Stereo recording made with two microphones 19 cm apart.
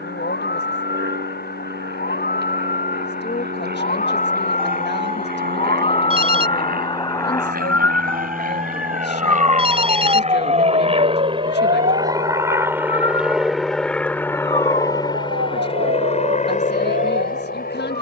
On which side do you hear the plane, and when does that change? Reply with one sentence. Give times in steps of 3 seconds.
You can hear the plane on the right from 0 s, in the centre from 12 s and on the left from 15 s.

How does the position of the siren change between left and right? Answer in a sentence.
In this clip you hear the siren go from the left side to the right.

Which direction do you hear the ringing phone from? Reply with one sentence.
You can hear the ringing phone on the right.